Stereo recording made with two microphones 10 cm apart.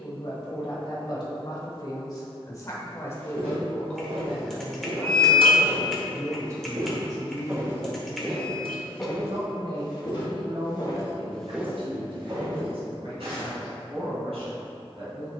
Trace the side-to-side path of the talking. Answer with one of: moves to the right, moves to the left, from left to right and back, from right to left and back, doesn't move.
moves to the right.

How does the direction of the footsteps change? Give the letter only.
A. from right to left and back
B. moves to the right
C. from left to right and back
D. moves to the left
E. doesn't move
A.